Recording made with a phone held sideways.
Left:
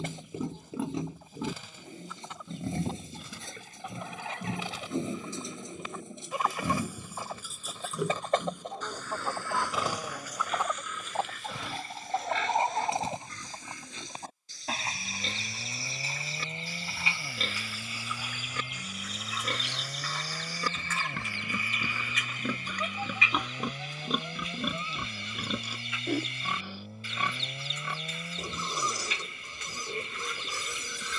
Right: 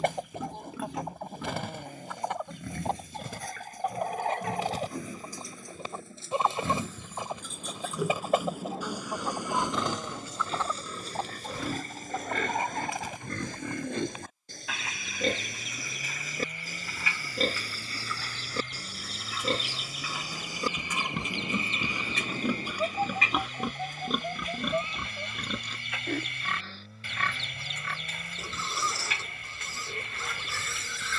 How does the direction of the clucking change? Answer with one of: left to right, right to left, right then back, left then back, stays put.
left then back.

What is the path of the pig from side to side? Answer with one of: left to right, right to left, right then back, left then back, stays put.
right then back.